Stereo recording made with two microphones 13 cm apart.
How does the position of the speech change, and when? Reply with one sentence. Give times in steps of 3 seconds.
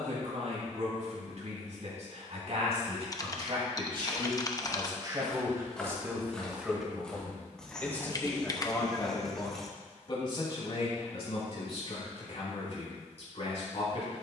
In this clip you hear the speech on the right from 0 s, in the centre from 6 s and on the left from 9 s.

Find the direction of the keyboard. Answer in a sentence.
You can hear the keyboard on the left.